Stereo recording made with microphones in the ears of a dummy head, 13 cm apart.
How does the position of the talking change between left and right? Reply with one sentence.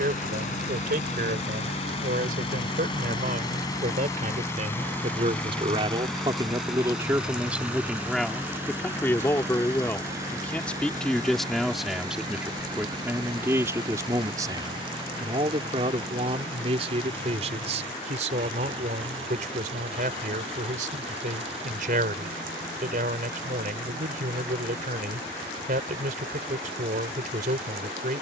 In this clip you hear the talking move from right to left and back again.